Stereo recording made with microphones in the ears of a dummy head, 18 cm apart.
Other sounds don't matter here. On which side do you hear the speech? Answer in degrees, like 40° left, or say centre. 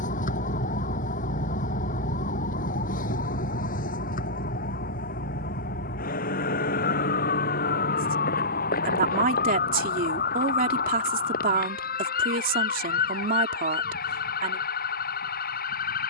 40° right.